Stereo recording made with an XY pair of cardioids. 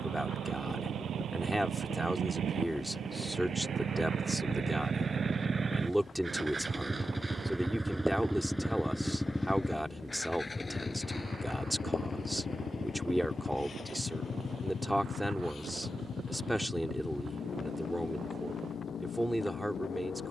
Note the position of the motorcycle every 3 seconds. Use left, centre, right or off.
right, right, centre, left, left, left, left.